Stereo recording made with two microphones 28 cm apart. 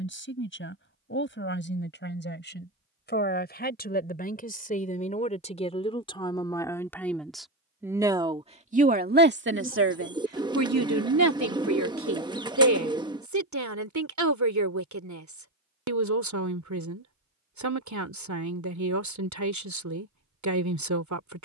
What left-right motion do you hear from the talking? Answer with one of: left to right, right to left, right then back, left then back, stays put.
left to right.